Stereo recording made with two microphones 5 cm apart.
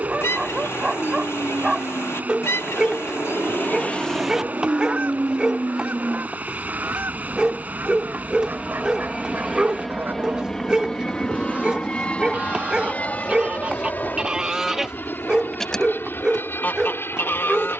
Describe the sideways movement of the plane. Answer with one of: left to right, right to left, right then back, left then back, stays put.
right to left.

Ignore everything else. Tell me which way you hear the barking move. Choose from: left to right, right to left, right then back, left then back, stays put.
stays put.